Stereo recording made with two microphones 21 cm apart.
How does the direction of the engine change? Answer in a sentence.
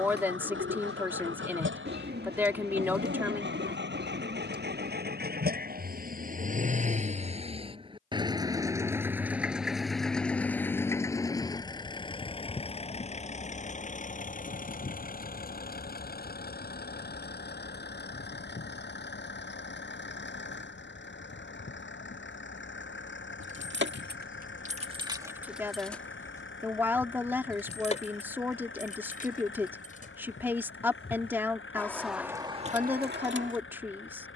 You can hear the engine travel towards the left.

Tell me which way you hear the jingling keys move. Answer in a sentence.
You can hear the jingling keys move from right to left and back again.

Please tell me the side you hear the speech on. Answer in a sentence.
You can hear the speech in the centre.